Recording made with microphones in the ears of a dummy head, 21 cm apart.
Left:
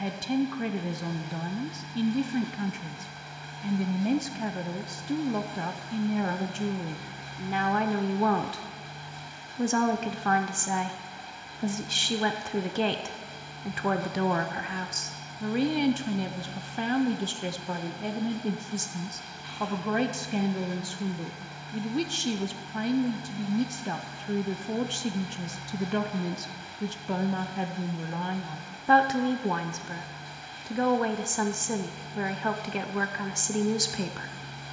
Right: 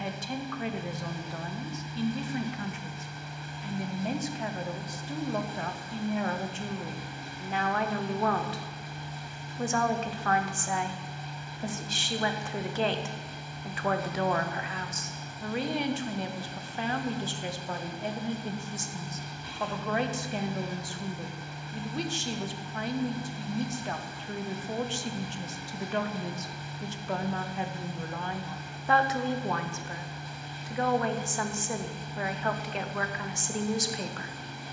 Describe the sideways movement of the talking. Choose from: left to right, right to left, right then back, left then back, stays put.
stays put.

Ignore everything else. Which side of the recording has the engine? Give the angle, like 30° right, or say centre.
70° right.